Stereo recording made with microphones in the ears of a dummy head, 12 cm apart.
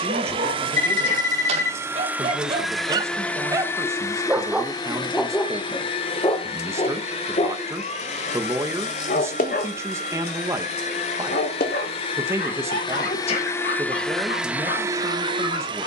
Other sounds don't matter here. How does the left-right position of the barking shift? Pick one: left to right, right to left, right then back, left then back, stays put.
right to left.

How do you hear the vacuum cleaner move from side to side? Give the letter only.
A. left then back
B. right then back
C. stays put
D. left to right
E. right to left
A.